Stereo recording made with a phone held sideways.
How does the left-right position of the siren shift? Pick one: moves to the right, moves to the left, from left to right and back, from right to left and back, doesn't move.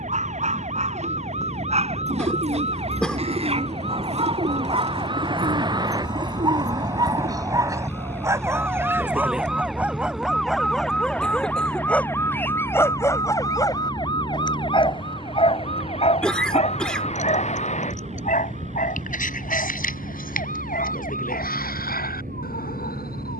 moves to the left.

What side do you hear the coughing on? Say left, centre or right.
centre.